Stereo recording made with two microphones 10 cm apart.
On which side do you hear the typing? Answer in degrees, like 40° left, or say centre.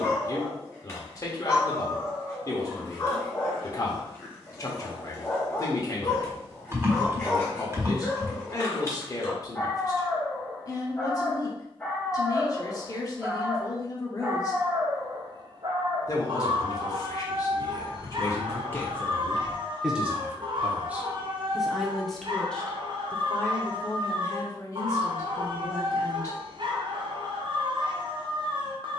30° right.